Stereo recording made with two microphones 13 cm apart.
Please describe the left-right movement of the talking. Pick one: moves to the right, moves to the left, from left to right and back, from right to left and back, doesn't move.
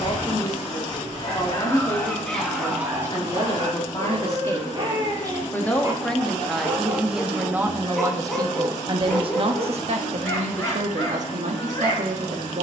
moves to the right.